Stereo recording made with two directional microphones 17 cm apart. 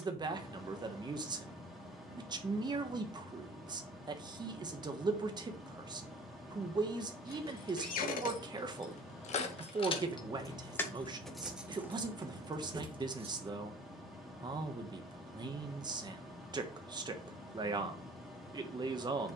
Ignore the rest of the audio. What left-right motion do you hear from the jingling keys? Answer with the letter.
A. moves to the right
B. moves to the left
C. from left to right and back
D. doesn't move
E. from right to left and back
A.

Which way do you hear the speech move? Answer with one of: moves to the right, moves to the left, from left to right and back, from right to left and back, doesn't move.
doesn't move.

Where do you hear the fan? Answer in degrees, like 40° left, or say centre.
centre.